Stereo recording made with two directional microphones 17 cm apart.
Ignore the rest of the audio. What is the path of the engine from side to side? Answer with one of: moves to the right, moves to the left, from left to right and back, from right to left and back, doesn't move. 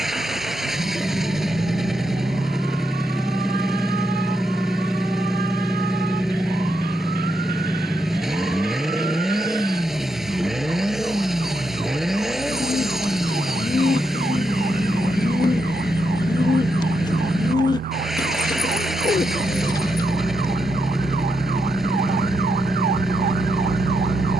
doesn't move.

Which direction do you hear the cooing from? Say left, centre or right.
left.